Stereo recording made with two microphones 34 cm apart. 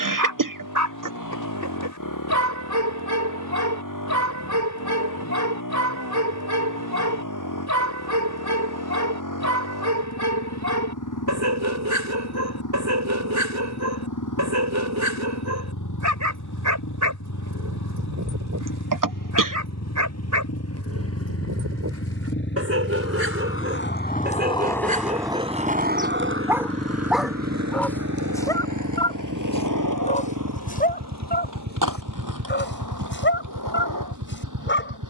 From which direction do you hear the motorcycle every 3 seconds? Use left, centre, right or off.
left, left, left, left, left, left, left, left, centre, right, right, right.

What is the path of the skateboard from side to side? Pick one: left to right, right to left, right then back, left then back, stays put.
left to right.